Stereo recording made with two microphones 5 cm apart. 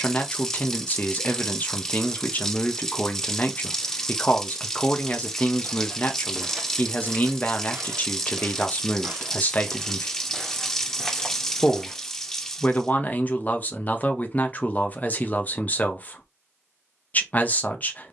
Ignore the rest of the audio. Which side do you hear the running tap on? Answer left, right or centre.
centre.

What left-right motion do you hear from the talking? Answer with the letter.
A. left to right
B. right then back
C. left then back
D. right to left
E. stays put
E.